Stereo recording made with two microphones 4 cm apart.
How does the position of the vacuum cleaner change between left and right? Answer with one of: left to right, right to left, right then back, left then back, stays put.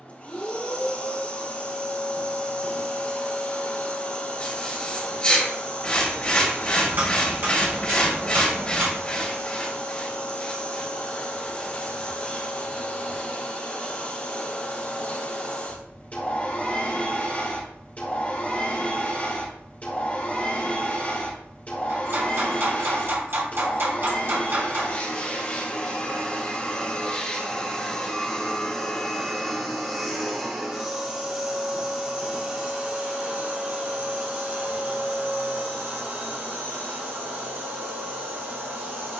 left to right.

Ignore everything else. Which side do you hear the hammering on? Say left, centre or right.
right.